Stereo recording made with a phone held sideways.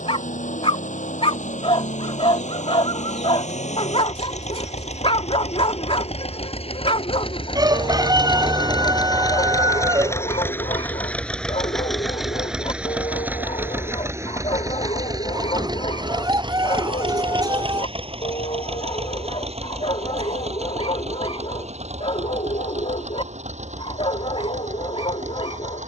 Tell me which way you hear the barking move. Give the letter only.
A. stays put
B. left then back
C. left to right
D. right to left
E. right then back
A.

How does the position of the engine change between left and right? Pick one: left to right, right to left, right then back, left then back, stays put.
left to right.